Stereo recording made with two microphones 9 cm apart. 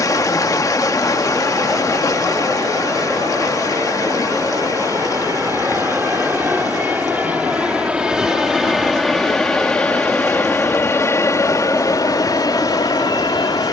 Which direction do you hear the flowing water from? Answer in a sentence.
You can hear the flowing water on the left.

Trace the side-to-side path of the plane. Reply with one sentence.
In this clip you hear the plane go from the right side to the left.